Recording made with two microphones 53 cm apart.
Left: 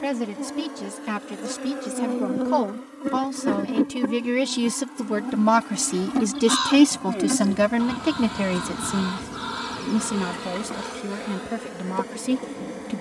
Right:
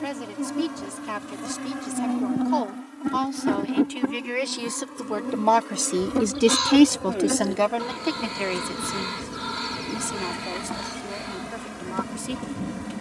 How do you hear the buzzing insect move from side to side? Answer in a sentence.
You can hear the buzzing insect move from right to left and back again.